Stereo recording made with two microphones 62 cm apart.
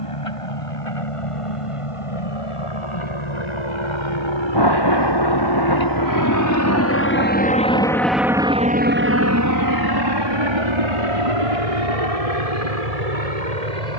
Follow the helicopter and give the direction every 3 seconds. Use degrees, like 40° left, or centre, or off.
60° left, 50° left, 10° left, 40° right, 70° right.